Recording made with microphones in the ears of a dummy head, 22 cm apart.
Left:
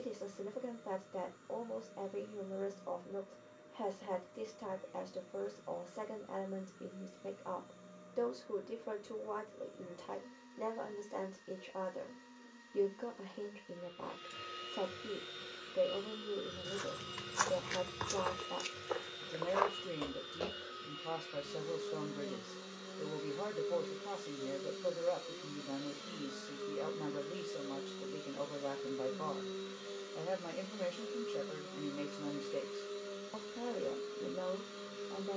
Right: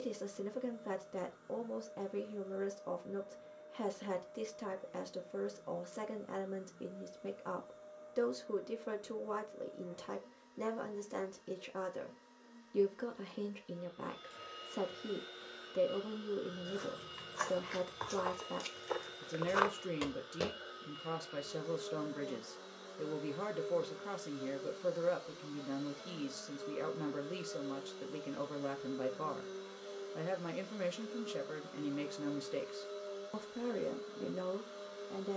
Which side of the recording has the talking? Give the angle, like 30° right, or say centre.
20° right.